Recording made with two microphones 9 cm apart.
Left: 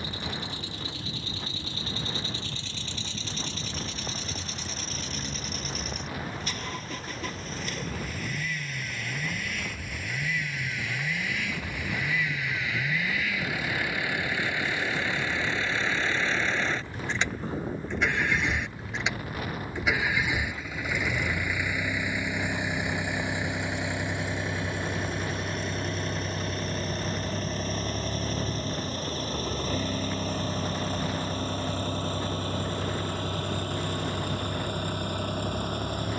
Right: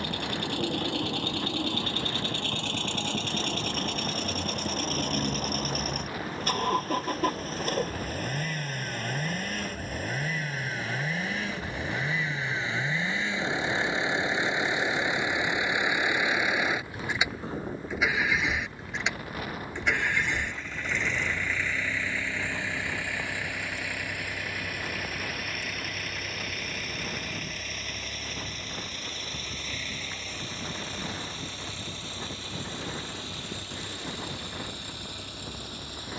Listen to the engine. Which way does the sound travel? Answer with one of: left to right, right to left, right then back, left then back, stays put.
right to left.